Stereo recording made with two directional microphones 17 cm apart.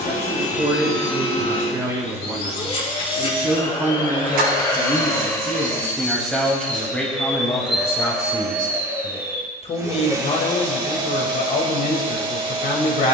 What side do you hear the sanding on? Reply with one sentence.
You can hear the sanding on the right.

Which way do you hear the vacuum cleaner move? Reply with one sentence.
You can hear the vacuum cleaner move from left to right.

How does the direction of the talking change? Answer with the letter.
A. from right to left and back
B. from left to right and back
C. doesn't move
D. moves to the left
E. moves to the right
D.